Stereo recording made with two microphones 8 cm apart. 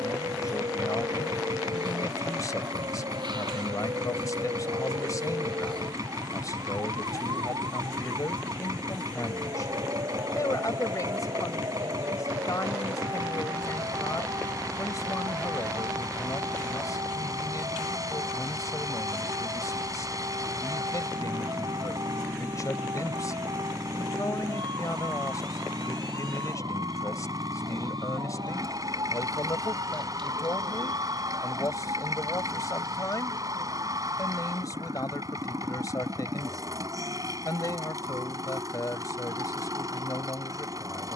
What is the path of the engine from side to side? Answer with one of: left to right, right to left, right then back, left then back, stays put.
stays put.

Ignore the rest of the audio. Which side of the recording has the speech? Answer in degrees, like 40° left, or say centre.
50° left.